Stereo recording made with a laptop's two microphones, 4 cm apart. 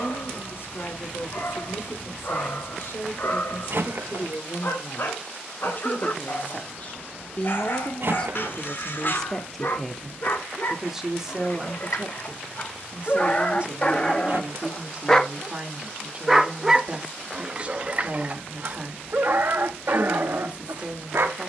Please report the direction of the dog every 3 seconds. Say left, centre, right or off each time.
left, left, left, left, left, centre, right.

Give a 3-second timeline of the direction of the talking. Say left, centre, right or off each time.
left, left, left, centre, right, right, right.